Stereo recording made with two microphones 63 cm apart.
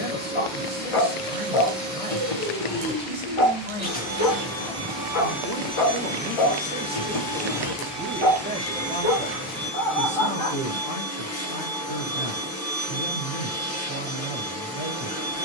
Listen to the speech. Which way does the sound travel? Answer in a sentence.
You can hear the speech move from left to right and back again.